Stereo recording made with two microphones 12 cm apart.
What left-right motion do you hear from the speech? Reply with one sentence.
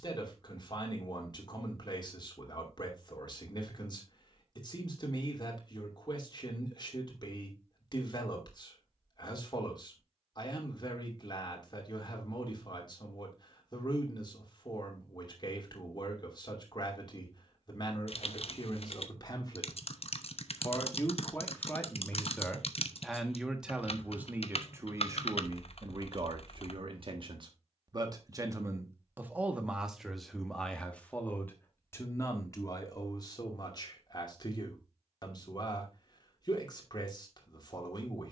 You can hear the speech move from left to right and back again.